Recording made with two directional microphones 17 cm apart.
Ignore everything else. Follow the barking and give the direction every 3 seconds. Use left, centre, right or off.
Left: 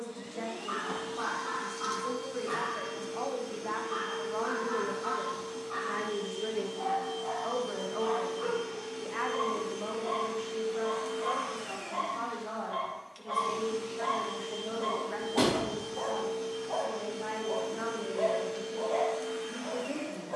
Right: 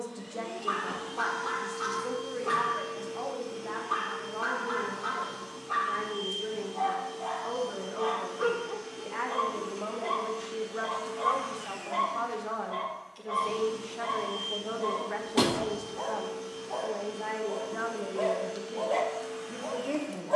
right, right, right, right, centre, left, right.